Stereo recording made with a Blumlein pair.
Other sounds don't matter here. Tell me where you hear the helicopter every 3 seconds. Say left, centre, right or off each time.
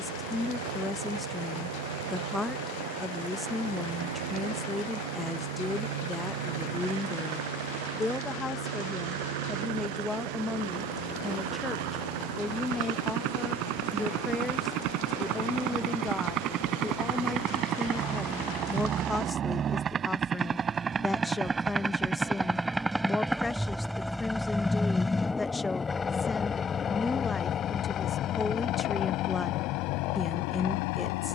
right, right, right, right, right, right, right, centre, centre, left, left.